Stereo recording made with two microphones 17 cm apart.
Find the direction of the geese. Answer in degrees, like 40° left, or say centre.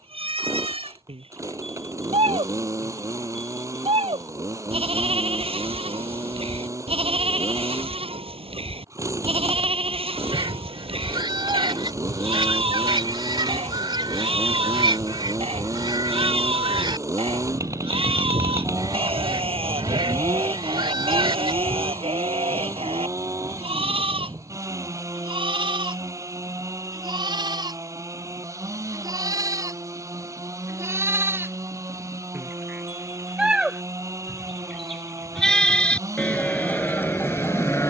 30° right.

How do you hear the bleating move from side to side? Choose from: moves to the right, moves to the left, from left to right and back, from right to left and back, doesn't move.
moves to the left.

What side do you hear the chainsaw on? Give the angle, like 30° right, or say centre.
20° right.